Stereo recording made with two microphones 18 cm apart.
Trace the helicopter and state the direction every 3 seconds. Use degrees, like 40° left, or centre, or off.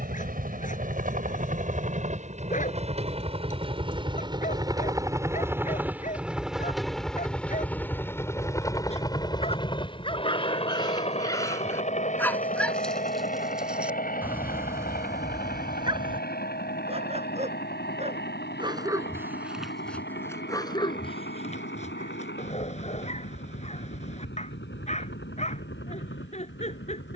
50° right, 20° right, 10° left, 30° left, 40° left, 50° left, 60° left, 60° left, 60° left.